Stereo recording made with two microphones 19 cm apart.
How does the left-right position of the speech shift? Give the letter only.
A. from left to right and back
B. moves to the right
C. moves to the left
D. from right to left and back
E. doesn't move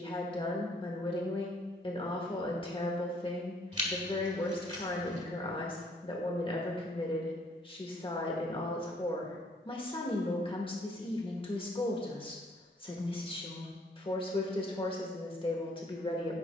E.